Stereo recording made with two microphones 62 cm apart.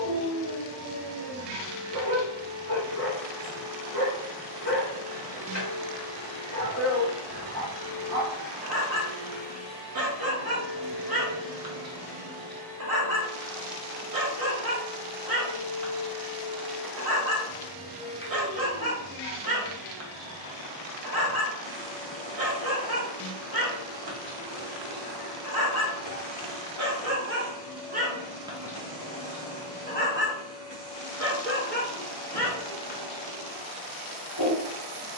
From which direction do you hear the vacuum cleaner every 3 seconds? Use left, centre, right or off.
left, left, left, centre, right, centre, left, left, left, left, left, left.